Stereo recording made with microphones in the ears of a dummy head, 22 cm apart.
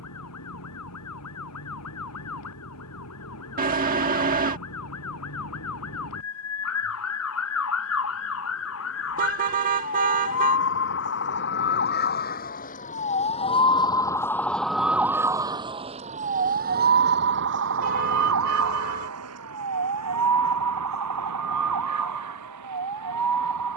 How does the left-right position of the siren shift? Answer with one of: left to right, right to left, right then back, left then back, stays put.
left to right.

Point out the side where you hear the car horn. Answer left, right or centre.
right.